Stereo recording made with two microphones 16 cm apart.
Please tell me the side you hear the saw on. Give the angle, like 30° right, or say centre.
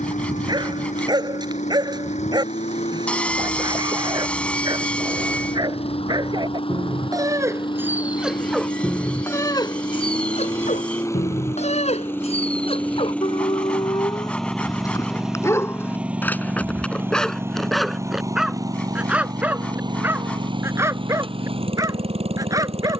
10° left.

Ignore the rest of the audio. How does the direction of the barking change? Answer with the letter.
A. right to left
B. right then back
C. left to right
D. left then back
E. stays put
D.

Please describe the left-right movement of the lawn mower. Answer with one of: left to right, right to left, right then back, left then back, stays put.
left to right.